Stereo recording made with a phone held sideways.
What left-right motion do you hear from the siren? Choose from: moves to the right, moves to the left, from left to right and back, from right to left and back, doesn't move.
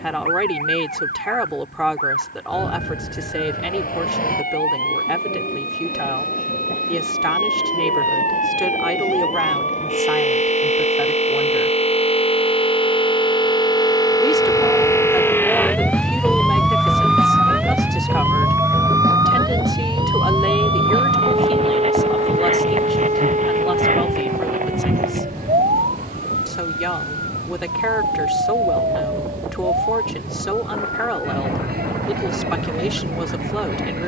moves to the right.